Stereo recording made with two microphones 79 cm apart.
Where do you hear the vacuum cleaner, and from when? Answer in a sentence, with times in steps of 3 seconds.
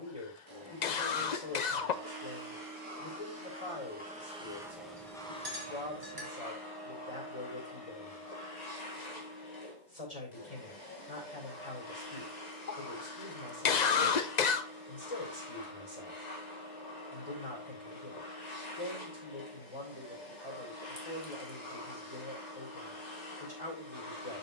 You can hear the vacuum cleaner on the right from 0 s, in the centre from 3 s and on the left from 6 s.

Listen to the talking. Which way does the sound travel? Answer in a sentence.
You can hear the talking stay in one place.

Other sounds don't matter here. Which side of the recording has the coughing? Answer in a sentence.
In this clip you hear the coughing on the left.